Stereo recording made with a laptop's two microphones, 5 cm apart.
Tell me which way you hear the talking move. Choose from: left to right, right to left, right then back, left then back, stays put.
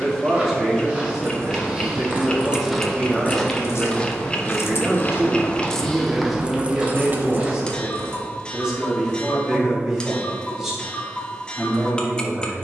stays put.